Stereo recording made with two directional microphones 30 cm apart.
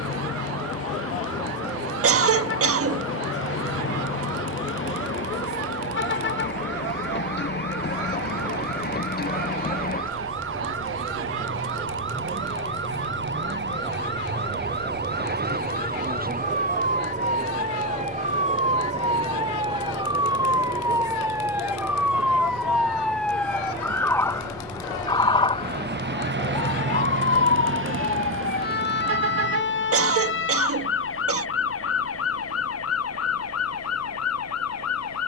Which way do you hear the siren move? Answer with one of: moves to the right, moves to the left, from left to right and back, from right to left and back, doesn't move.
moves to the left.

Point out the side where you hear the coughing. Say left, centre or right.
right.